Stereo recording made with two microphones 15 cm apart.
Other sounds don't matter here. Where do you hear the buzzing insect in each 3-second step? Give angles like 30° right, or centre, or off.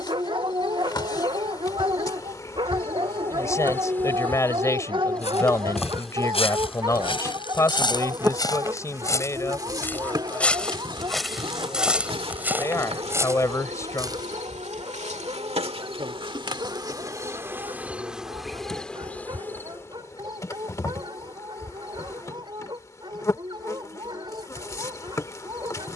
30° left, 10° left, 10° right, 30° right, 40° right, 30° right, 10° left, 20° left, 20° left.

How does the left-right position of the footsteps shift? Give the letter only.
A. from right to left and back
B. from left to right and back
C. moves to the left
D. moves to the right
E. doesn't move
D.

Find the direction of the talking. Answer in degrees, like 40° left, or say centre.
20° left.